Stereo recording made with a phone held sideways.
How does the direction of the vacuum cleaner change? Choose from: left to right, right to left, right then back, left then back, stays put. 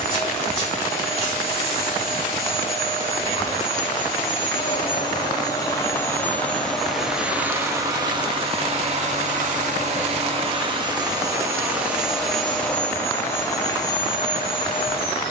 right then back.